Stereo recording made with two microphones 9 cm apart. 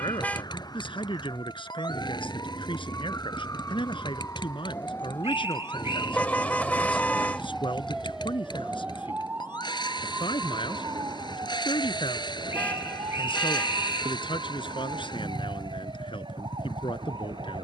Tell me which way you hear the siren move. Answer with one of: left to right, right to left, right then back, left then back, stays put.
left to right.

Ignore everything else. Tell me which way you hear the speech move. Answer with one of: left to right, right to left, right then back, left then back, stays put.
stays put.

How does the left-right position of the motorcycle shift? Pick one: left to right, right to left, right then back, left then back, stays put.
stays put.